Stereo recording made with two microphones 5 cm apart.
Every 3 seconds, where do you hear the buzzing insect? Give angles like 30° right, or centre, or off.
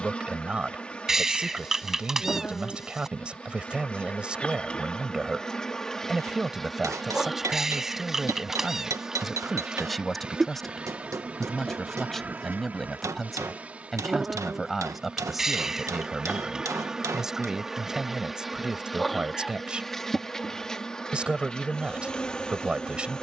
20° left, 20° left, centre, 20° right, 30° right, 10° right, centre, 20° left.